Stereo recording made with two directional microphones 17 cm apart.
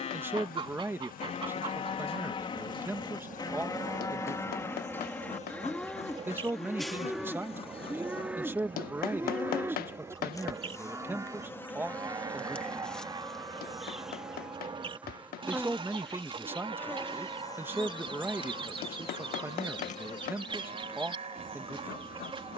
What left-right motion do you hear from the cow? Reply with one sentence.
In this clip you hear the cow move to the right.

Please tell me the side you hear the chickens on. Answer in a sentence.
You can hear the chickens on the right.